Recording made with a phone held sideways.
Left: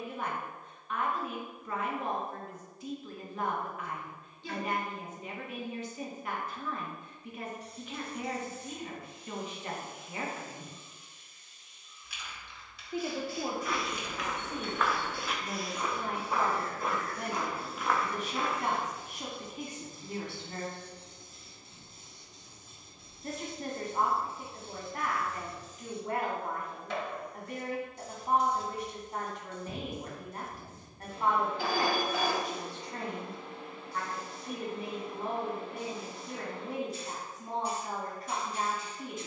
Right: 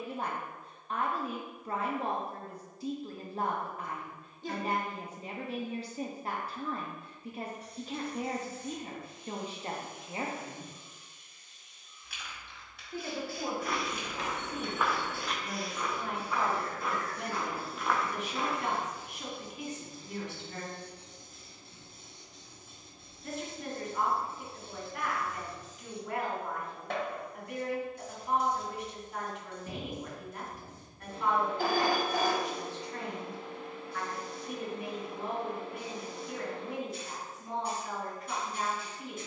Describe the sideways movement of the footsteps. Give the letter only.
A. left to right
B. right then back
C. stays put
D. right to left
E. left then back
E.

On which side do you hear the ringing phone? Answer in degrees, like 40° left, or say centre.
50° right.